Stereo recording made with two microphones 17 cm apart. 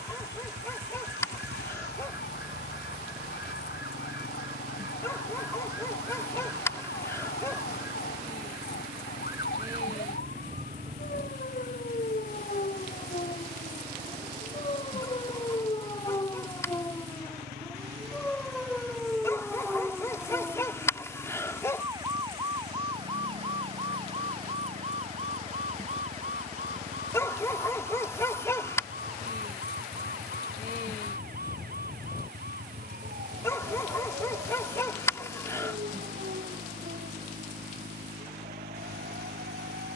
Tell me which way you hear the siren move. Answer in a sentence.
In this clip you hear the siren travel towards the right.